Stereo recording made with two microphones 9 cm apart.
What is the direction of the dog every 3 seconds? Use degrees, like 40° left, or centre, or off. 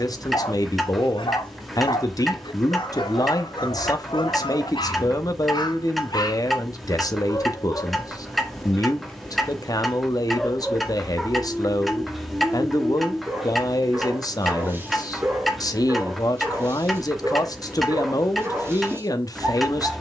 70° left, 70° left, 40° left, centre, 20° right, 30° right, 30° right.